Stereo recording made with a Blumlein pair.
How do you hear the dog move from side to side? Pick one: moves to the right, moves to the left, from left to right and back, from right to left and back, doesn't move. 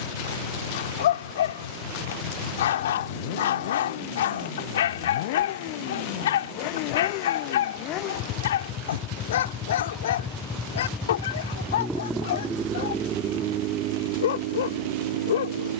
doesn't move.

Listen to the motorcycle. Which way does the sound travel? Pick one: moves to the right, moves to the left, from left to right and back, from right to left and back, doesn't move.
moves to the right.